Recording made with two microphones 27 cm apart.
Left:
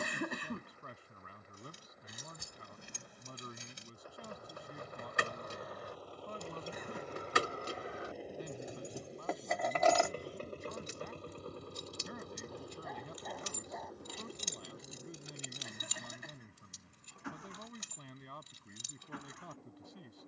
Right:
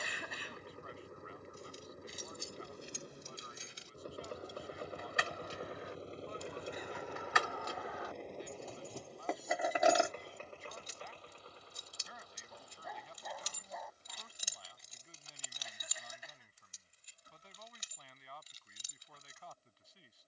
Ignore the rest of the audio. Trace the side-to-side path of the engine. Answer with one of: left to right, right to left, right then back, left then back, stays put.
right to left.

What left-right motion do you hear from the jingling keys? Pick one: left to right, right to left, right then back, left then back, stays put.
right then back.